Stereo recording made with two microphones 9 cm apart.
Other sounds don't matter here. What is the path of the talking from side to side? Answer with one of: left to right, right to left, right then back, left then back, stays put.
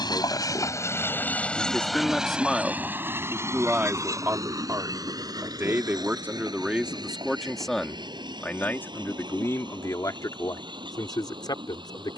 right then back.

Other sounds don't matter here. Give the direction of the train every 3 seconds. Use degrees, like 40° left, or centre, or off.
10° left, 40° right, 50° right, 60° right.